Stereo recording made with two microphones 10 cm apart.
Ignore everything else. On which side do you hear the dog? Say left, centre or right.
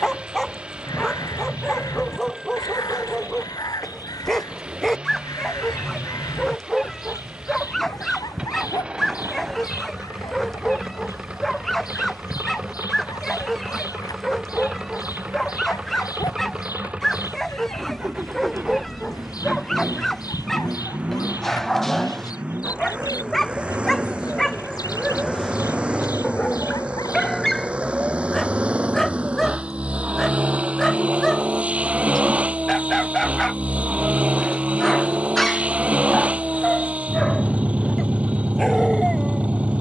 centre.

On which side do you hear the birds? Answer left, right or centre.
left.